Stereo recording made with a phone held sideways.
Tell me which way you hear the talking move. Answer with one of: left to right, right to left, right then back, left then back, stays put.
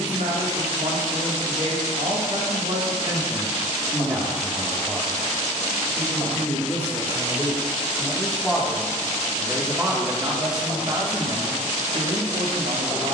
left then back.